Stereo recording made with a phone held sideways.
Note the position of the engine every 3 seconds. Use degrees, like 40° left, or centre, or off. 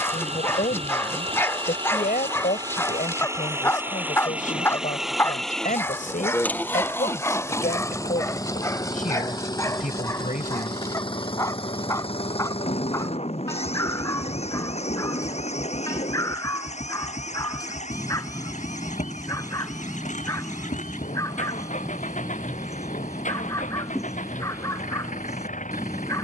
40° right, 10° right, 20° left, 40° left, 50° left, 50° left, 60° left, 60° left, 60° left.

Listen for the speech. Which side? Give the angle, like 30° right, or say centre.
70° left.